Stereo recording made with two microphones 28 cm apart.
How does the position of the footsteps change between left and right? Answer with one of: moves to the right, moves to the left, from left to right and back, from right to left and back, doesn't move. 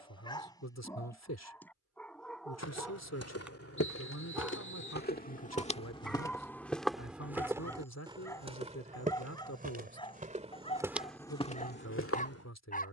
from left to right and back.